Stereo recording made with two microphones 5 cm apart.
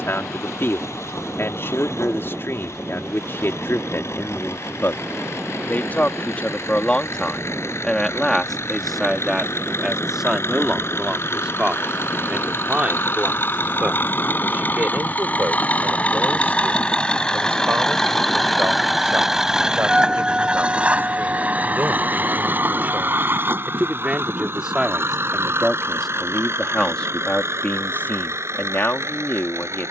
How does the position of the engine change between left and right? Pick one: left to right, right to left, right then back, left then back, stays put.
left to right.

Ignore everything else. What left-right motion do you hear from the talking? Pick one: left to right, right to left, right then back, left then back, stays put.
right then back.